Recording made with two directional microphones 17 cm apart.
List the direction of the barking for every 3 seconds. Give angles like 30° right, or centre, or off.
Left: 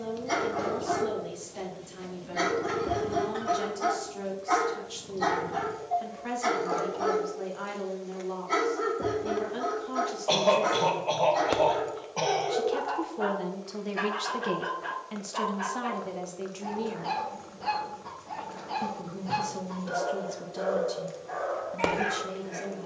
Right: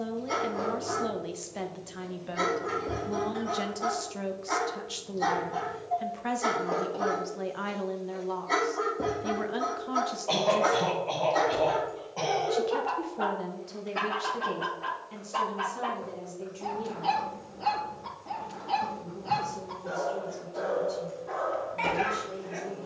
20° left, 10° left, 20° right, 40° right, 60° right, 60° right, 60° right, 60° right.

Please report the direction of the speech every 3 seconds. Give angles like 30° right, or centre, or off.
30° right, 30° right, 30° right, 30° right, 20° left, 50° left, 60° left, 60° left.